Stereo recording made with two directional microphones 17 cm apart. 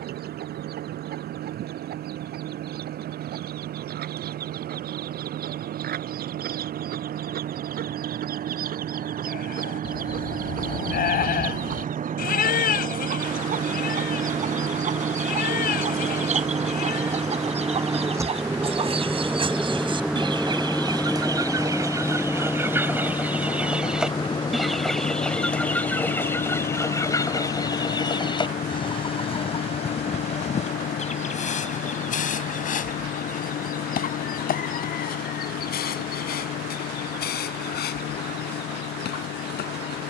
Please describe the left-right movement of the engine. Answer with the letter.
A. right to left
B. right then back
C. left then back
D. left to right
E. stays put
A.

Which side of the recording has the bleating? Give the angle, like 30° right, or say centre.
60° left.